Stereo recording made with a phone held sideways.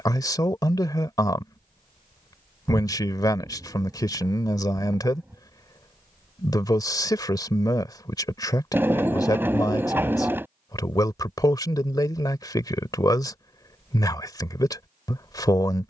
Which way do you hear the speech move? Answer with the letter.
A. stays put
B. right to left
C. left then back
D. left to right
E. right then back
A.